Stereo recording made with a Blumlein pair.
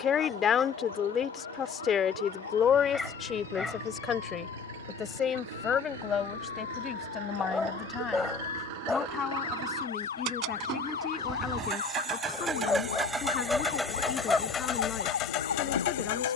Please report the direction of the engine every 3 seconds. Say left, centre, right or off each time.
right, right, right, right, centre, left.